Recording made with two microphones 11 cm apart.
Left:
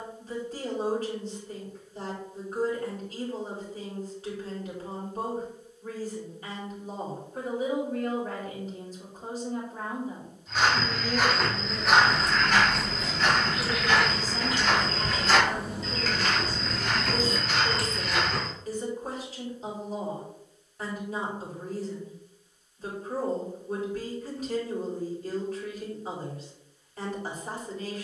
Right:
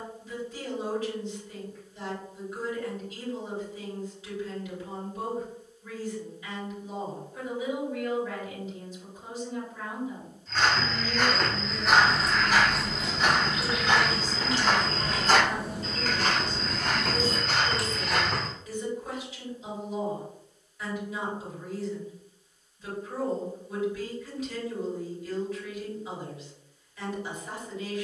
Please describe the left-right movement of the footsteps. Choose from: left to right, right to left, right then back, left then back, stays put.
left to right.